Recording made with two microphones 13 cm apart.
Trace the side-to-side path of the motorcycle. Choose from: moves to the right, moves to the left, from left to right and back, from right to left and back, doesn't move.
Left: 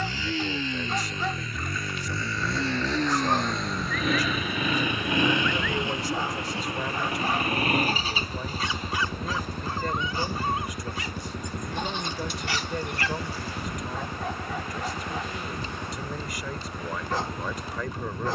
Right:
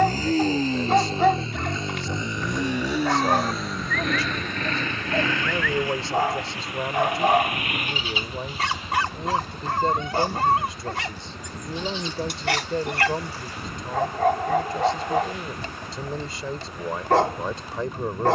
moves to the left.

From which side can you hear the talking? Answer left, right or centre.
right.